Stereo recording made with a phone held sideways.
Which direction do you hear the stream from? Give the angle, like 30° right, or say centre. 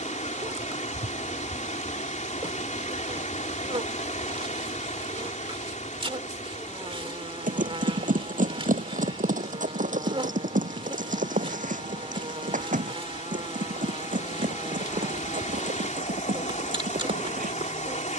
60° left.